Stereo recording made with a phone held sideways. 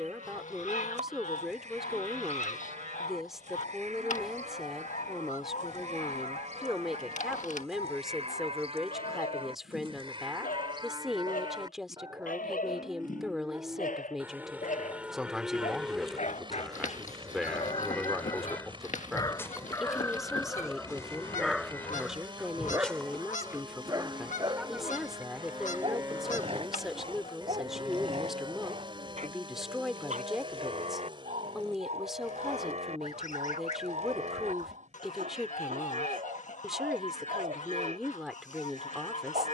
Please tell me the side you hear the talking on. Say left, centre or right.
centre.